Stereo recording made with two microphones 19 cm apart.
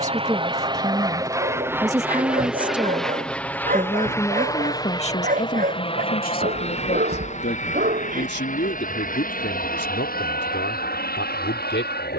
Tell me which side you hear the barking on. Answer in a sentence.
In this clip you hear the barking on the right.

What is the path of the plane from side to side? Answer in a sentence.
You can hear the plane move to the left.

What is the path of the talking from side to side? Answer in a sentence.
You can hear the talking go from the right side to the left.